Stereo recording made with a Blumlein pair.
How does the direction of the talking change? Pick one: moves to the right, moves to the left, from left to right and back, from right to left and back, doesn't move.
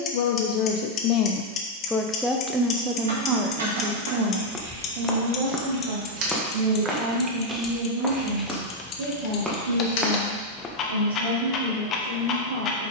moves to the right.